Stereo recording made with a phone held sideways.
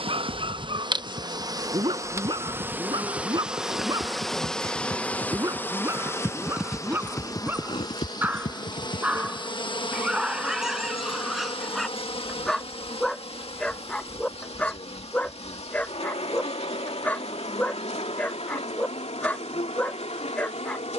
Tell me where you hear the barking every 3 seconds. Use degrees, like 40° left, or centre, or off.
40° right, 30° right, 20° right, centre, 10° left, 10° left, 10° left.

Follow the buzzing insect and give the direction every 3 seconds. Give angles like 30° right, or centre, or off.
30° right, centre, 30° left, 40° left, 50° left, 50° left, 60° left.